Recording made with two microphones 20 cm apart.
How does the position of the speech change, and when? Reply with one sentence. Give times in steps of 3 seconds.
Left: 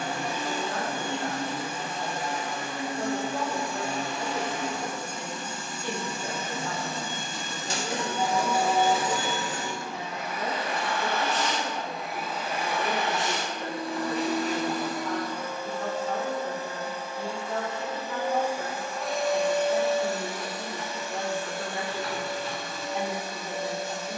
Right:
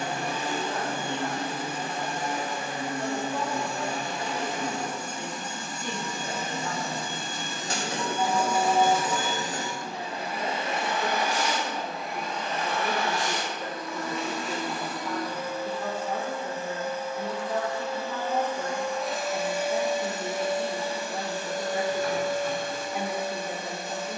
You can hear the speech on the left from 0 s and in the centre from 9 s.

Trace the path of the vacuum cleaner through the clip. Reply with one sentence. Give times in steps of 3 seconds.
You can hear the vacuum cleaner on the right from 0 s, on the left from 12 s, in the centre from 18 s and on the right from 21 s.